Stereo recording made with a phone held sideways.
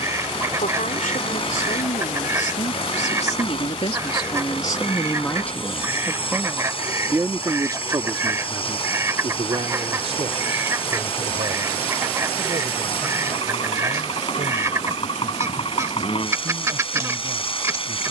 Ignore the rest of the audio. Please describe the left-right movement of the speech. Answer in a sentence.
In this clip you hear the speech move from left to right.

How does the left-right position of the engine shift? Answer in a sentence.
In this clip you hear the engine stay in one place.